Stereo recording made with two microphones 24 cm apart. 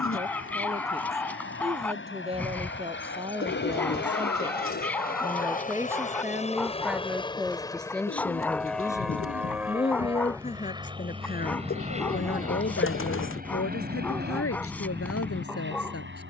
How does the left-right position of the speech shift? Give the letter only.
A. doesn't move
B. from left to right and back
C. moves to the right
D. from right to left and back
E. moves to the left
E.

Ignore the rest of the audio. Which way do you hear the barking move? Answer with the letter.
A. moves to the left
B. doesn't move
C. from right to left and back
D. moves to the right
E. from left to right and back
B.